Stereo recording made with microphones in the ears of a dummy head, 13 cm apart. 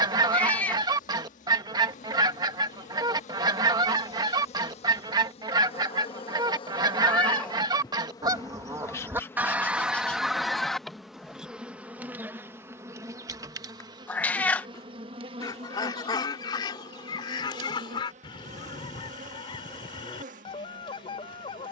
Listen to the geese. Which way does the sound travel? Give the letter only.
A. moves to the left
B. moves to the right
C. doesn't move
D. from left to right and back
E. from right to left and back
A.